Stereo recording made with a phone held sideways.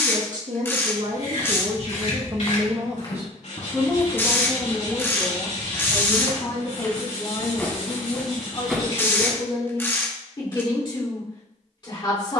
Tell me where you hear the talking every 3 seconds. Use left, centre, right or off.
right, centre, left, left.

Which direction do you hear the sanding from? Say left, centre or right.
left.